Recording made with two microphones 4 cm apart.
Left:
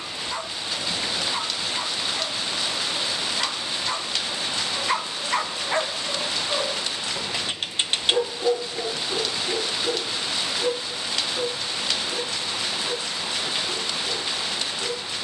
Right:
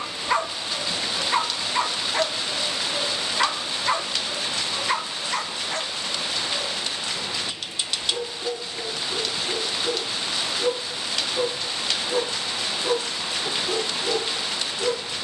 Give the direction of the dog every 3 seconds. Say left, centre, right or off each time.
right, centre, left, centre, right.